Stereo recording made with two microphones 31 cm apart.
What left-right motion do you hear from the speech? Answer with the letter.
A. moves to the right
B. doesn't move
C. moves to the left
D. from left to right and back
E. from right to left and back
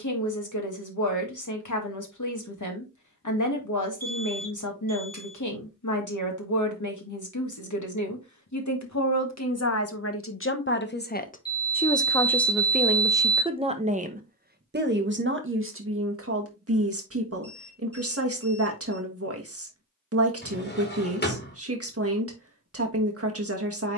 A.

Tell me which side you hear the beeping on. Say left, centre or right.
left.